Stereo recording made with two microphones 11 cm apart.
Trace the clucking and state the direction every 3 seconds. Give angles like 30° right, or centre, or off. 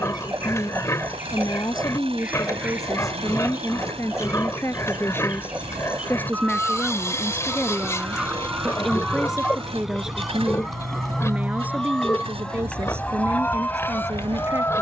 20° right, 10° right, 10° right, centre, 20° left.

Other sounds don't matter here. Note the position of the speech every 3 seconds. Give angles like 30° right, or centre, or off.
30° left, 20° left, 10° left, 10° right, 20° right.